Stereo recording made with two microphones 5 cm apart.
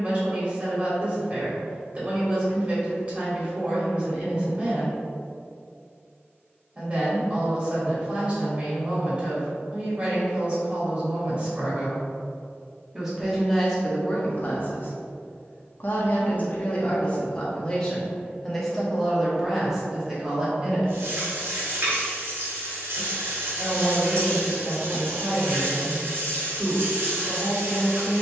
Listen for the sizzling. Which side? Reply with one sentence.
In this clip you hear the sizzling on the right.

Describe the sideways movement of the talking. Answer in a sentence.
You can hear the talking go left and come back.